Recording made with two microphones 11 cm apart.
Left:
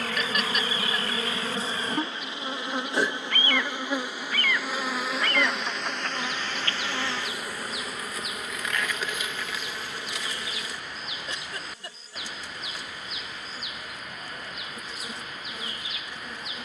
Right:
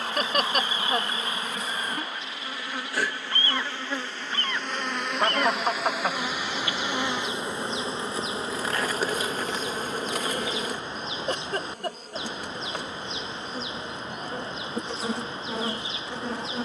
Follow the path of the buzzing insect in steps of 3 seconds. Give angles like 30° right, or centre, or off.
30° left, 10° left, 20° right, 50° right, 60° right, 70° right.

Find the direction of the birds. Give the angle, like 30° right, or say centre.
30° right.